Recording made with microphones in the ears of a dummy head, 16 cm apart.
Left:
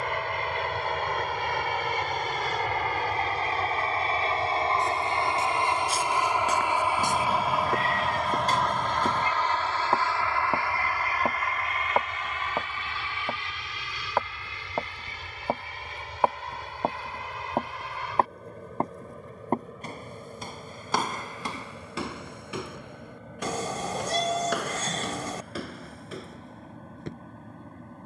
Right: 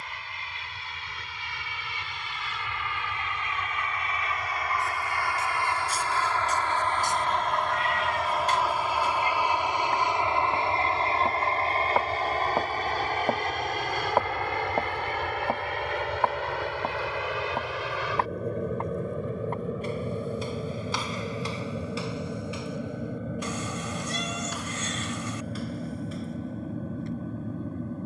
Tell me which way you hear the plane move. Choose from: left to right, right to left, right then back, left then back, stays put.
left to right.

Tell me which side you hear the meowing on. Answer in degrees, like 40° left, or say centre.
30° left.